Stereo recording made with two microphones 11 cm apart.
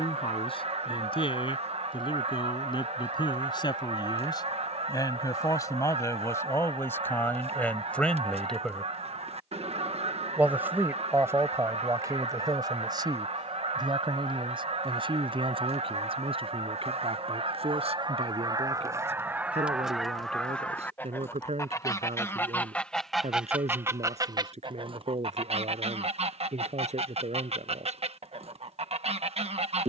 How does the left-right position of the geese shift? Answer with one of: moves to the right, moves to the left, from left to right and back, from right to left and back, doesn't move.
from right to left and back.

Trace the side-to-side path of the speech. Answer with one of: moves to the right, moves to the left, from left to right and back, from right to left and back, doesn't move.
moves to the right.